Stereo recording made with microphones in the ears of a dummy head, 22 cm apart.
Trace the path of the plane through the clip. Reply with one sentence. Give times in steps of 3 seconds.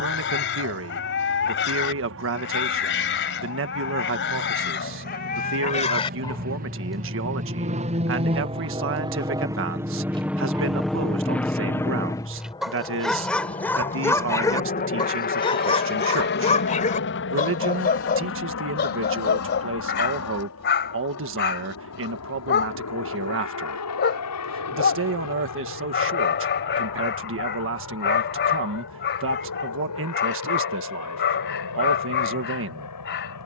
In this clip you hear the plane on the right from 0 s, in the centre from 9 s and on the left from 12 s.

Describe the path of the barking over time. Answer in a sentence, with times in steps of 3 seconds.
You can hear the barking on the left from 0 s, in the centre from 6 s, on the right from 9 s, in the centre from 12 s and on the left from 15 s.